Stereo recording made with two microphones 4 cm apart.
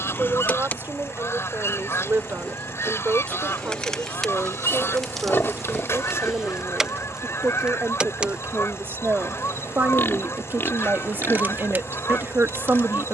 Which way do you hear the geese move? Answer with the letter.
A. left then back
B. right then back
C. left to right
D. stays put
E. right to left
D.